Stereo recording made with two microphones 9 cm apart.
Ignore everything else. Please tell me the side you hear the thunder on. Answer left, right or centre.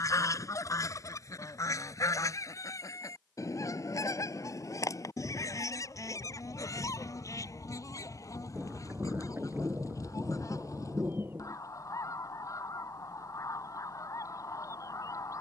right.